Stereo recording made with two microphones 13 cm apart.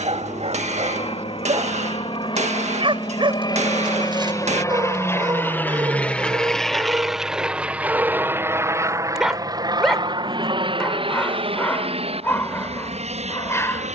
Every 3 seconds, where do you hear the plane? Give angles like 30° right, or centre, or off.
50° left, 30° left, 10° right, 40° right, 50° right.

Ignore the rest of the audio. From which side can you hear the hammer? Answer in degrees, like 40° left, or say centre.
60° right.